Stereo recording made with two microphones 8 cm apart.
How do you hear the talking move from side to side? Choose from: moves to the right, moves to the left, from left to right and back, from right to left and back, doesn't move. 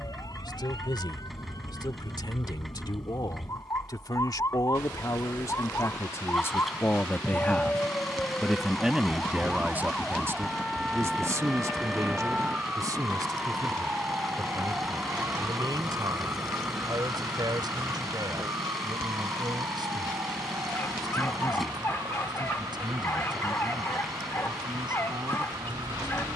moves to the right.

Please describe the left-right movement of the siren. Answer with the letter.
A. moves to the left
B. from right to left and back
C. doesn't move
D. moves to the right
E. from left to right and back
D.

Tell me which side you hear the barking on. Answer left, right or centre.
left.